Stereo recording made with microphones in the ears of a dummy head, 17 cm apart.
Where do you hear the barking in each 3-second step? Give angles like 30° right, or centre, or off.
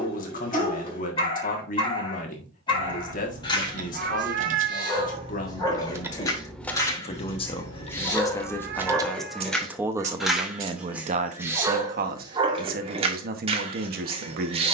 30° left, 20° left, 10° left, centre, 30° right.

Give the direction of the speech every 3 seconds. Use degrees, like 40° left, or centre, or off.
50° left, 50° left, 30° left, 30° right, 50° right.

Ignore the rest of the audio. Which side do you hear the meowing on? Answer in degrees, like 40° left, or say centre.
50° right.